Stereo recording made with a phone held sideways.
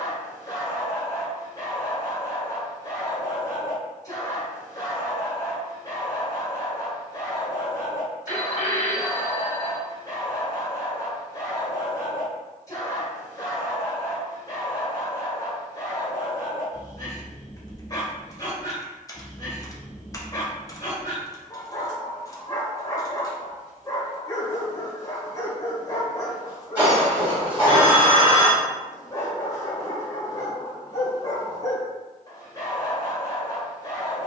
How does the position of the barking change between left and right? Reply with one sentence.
You can hear the barking stay in one place.